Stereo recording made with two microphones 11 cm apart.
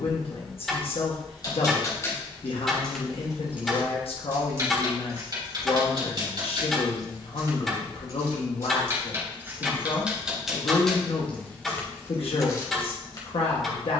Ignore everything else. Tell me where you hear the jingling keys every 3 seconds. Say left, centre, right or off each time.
left, right, right, centre, left.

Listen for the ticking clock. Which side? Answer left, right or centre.
centre.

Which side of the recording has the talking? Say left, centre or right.
left.